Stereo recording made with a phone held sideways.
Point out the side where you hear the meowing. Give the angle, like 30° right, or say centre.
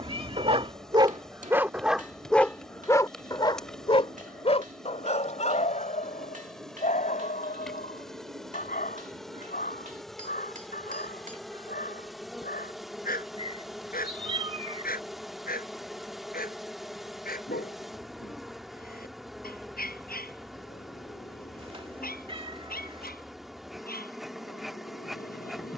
40° right.